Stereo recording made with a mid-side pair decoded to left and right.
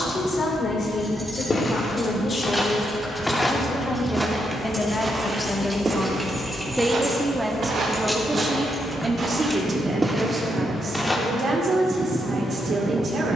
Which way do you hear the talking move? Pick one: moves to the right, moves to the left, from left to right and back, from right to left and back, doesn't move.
moves to the right.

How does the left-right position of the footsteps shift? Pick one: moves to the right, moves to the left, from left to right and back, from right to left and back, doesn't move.
from left to right and back.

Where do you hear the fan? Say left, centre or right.
right.